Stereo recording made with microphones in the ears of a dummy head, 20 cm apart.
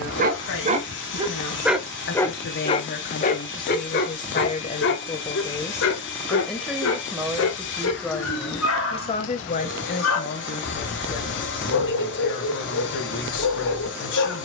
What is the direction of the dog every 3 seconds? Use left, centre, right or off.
centre, left, left, left, left.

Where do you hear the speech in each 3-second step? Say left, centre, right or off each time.
left, left, centre, left, left.